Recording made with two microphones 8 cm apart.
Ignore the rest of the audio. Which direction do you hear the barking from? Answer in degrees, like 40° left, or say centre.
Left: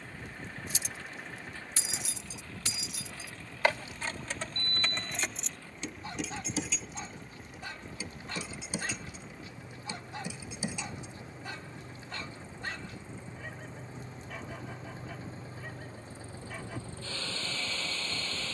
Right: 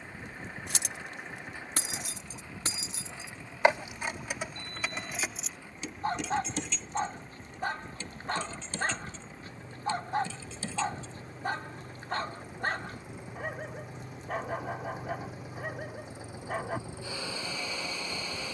50° right.